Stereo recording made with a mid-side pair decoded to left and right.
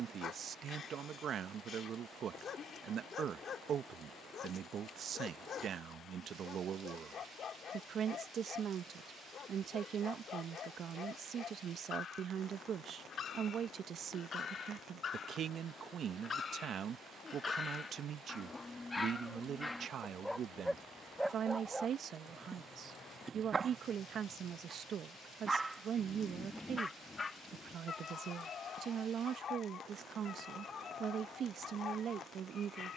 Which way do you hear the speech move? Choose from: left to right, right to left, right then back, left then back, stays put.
stays put.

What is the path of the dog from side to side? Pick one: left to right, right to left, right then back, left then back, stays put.
right then back.